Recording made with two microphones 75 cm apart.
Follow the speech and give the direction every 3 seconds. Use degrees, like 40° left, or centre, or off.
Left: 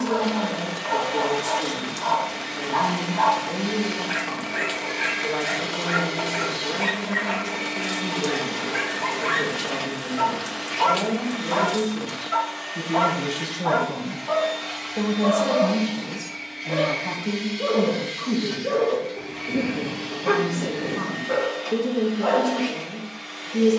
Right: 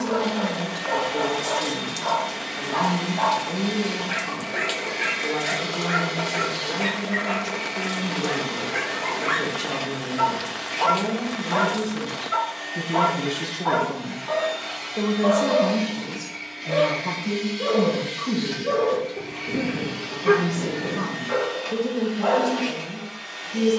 30° right, 30° right, 30° right, 30° right, 10° left, centre, 20° right, 20° right.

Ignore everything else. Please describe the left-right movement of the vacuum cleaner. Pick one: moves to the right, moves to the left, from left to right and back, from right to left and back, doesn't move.
moves to the right.